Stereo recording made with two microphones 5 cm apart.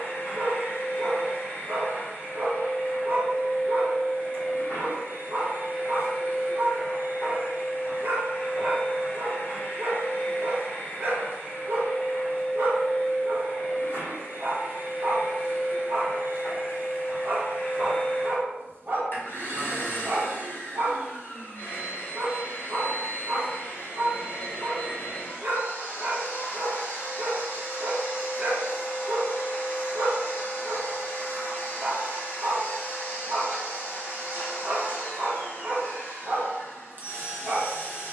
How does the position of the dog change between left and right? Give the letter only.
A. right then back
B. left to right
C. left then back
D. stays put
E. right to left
D.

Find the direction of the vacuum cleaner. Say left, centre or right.
left.